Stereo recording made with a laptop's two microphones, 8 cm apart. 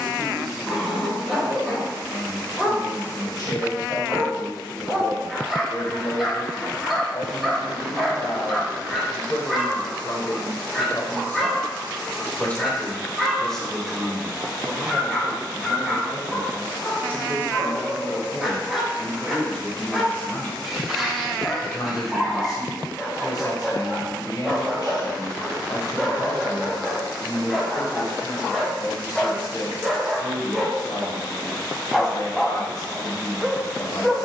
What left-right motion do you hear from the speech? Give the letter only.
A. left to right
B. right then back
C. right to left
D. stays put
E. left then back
B.